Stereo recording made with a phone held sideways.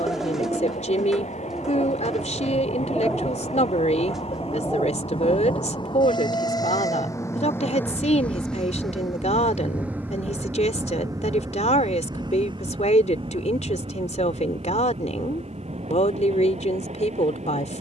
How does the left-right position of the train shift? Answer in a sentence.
You can hear the train travel towards the right.